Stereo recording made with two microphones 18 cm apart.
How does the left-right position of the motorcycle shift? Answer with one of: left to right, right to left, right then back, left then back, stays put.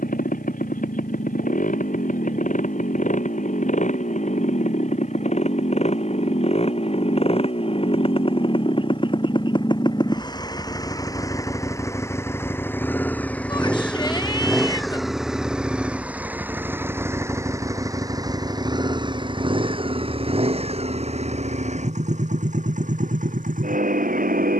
left to right.